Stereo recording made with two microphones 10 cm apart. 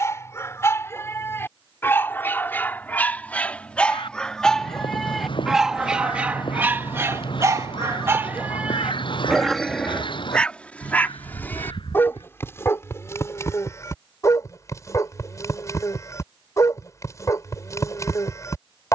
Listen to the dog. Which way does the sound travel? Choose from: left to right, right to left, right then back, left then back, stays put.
right then back.